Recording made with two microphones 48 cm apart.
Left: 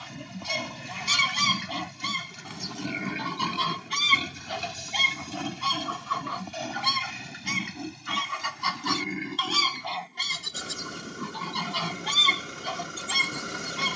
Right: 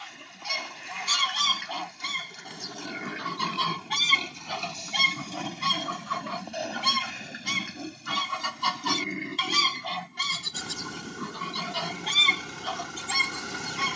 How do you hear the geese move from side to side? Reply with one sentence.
You can hear the geese go right and come back.